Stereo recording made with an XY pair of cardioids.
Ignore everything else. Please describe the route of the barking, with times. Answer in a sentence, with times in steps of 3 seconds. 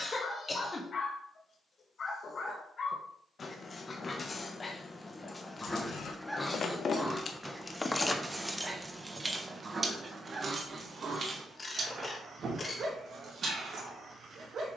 You can hear the barking on the left from 0 s, in the centre from 6 s and on the right from 9 s.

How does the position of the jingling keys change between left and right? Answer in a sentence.
You can hear the jingling keys go from the left side to the right.